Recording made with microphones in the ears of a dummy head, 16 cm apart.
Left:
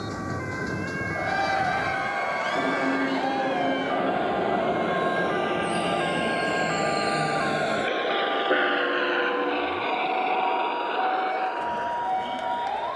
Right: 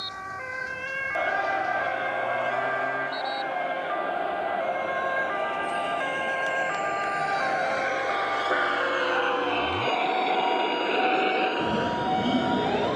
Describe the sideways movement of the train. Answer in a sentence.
You can hear the train move to the right.